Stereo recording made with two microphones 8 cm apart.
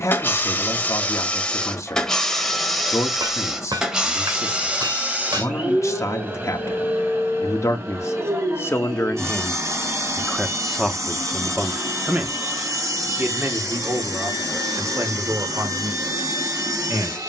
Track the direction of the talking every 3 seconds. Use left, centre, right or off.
left, left, left, centre, right, right.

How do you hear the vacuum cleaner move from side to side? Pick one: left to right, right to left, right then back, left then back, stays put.
left to right.